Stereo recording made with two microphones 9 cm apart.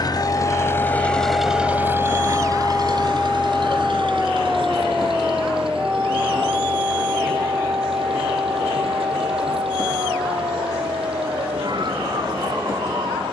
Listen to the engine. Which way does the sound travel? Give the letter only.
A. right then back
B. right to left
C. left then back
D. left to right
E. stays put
D.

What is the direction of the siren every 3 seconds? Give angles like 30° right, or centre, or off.
30° left, centre, 30° right, 40° right, 50° right.